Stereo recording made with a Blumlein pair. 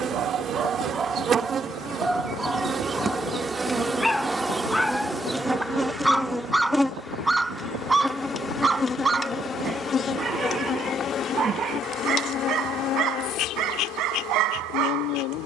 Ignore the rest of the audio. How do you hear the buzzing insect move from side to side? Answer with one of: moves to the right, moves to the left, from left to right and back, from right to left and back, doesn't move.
moves to the left.